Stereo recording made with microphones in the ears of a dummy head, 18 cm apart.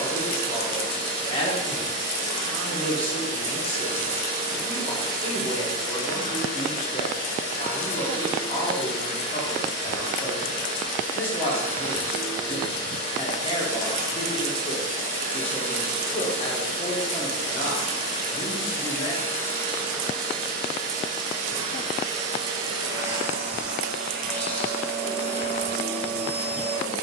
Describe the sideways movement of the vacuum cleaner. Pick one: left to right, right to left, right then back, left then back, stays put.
right to left.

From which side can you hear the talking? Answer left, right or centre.
left.